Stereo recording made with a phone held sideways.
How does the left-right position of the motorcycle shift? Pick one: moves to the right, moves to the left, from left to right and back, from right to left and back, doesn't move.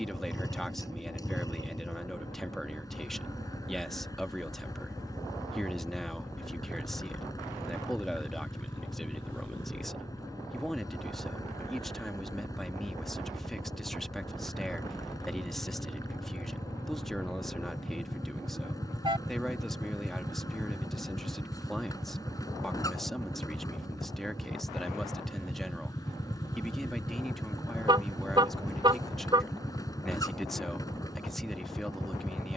doesn't move.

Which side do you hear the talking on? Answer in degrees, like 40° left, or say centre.
centre.